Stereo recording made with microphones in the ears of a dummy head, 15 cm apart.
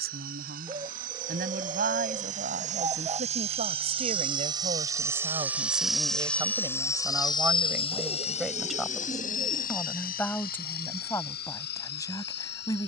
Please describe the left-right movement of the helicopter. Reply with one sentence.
You can hear the helicopter go from the right side to the left.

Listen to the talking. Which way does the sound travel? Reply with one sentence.
In this clip you hear the talking move to the left.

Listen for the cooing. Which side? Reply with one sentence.
In this clip you hear the cooing on the right.